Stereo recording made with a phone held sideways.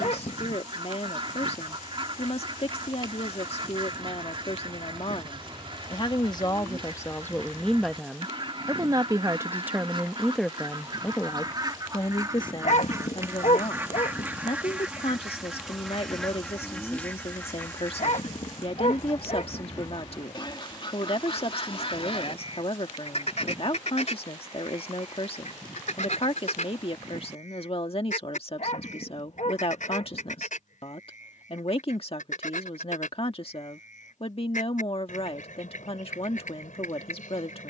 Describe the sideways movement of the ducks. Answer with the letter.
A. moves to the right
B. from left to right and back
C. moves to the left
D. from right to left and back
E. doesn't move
C.